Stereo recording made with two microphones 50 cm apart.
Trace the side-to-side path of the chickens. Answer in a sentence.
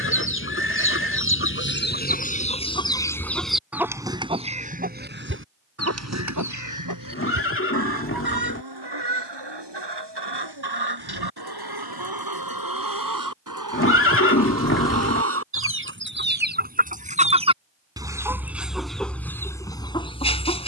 You can hear the chickens move from left to right and back again.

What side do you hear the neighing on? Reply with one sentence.
In this clip you hear the neighing on the left.